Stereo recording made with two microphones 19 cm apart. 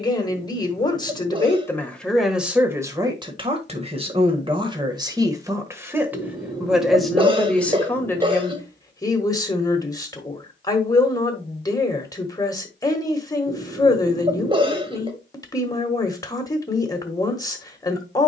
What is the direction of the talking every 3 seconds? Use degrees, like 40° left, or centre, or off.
10° left, 20° right, centre, 20° left, 20° left, 20° left.